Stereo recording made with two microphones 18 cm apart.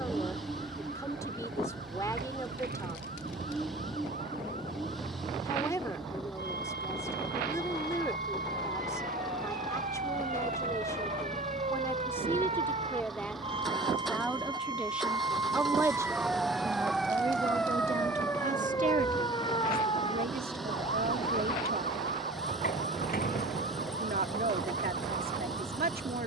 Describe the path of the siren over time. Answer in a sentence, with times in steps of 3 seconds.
You can hear the siren on the right from 0 s, in the centre from 15 s and on the left from 18 s.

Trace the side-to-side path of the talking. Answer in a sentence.
You can hear the talking move from left to right.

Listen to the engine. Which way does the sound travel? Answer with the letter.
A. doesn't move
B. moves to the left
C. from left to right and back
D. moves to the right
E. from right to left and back
A.